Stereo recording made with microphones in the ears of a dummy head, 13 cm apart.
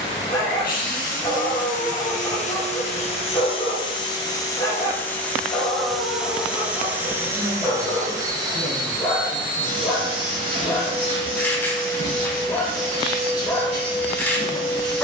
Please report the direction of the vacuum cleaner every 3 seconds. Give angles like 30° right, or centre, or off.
60° left, 20° left, 20° right, 40° right, 50° right.